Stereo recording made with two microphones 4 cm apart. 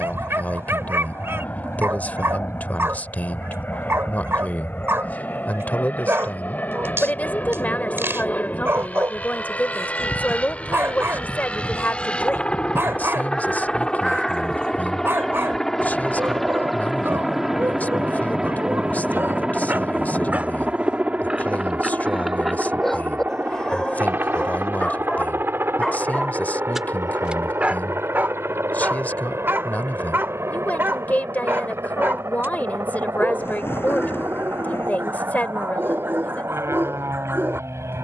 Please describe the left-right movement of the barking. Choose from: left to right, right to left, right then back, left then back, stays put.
left then back.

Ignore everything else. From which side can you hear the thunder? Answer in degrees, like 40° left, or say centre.
60° left.